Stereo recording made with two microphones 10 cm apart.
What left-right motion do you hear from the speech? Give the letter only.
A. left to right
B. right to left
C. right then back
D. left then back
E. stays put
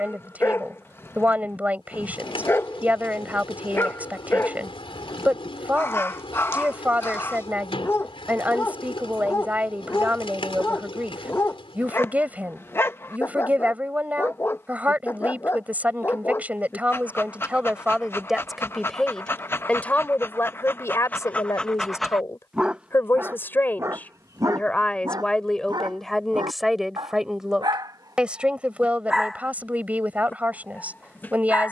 D.